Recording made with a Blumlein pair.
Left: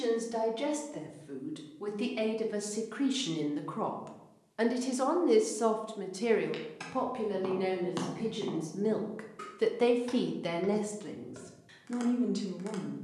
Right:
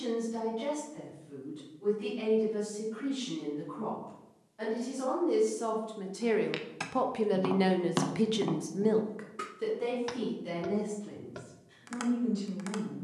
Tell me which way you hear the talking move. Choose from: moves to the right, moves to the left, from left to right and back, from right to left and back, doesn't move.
from left to right and back.